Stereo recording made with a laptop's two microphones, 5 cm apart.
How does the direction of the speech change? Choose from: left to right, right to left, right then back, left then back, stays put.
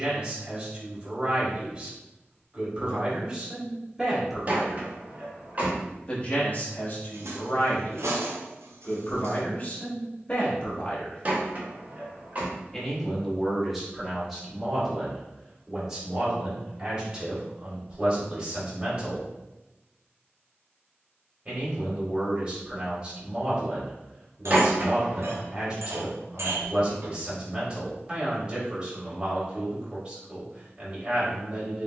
left then back.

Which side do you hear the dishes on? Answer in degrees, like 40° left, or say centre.
70° right.